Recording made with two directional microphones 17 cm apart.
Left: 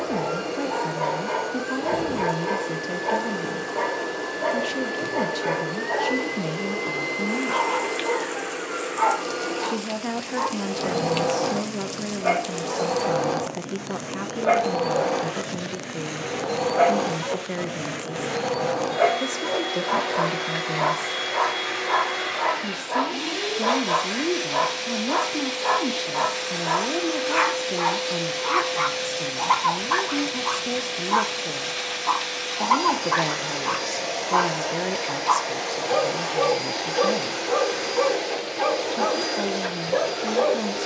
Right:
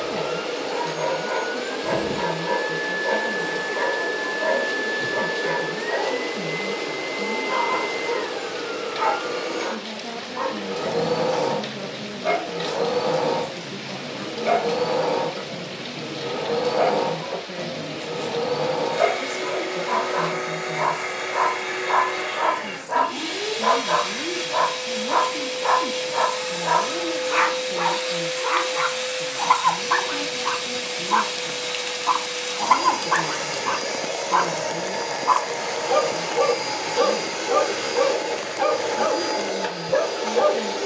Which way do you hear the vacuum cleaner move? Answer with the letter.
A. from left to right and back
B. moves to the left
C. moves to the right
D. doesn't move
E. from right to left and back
D.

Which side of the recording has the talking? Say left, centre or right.
left.